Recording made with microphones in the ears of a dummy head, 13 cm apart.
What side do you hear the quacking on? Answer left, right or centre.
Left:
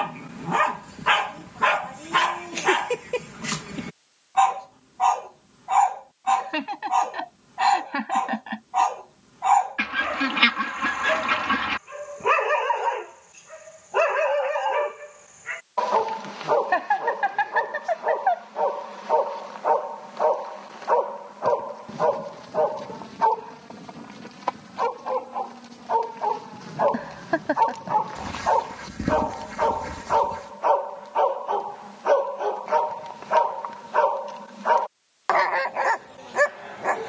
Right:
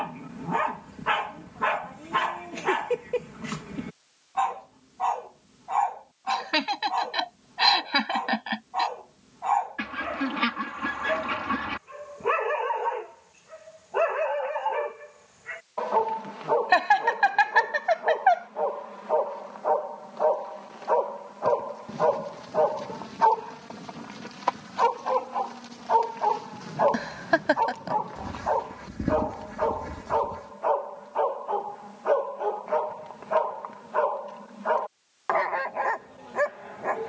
left.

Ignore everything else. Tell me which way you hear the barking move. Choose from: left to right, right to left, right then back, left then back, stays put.
right then back.